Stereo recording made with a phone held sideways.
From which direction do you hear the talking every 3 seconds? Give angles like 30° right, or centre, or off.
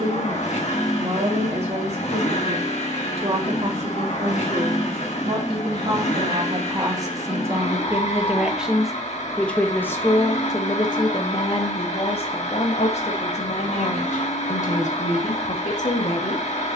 60° right, 50° right, 20° right, 30° left, 60° left, 60° left.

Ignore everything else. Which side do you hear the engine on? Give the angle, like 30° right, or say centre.
60° left.